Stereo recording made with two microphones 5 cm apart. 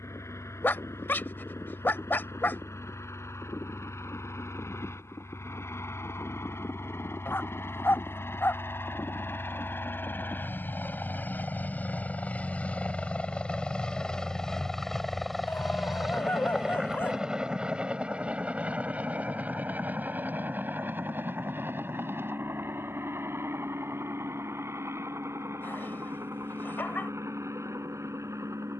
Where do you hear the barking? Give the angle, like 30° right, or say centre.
40° left.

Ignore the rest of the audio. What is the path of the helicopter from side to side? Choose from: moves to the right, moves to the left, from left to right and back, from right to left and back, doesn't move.
moves to the right.